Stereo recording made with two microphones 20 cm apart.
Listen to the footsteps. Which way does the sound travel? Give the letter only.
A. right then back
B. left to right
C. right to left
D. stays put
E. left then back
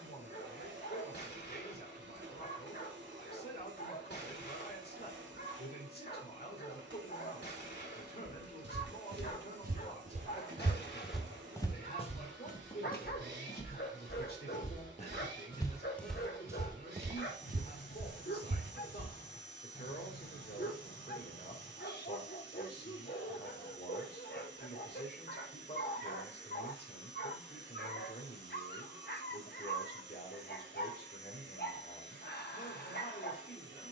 E.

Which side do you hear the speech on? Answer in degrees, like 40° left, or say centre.
50° left.